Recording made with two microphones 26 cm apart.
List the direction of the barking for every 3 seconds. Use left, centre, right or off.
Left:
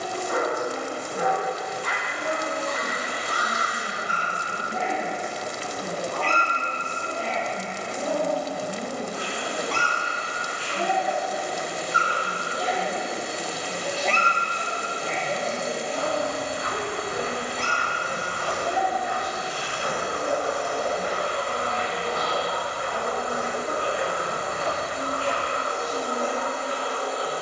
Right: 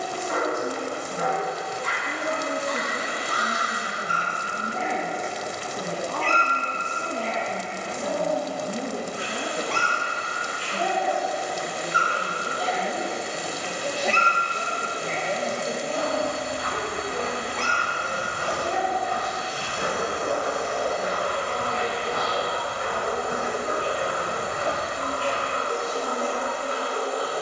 left, left, left, left, centre, right, right, right, right.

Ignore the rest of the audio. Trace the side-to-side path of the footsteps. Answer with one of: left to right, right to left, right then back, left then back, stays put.
right then back.